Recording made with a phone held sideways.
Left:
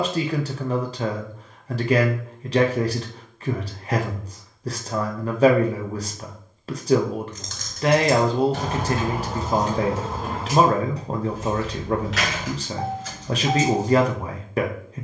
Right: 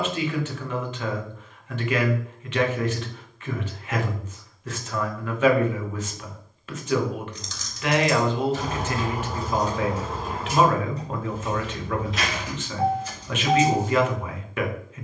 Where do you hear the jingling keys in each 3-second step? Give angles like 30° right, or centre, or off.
off, off, 50° left, 70° left, 80° left.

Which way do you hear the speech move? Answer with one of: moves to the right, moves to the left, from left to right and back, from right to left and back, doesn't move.
doesn't move.